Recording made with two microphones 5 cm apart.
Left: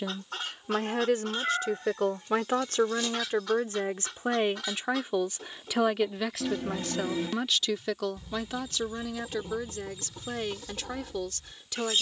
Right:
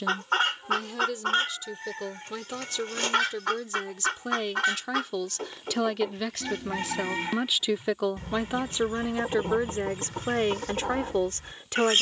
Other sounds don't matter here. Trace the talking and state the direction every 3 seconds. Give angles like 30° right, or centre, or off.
40° left, 30° left, 10° right, 40° right.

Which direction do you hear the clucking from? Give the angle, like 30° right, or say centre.
60° right.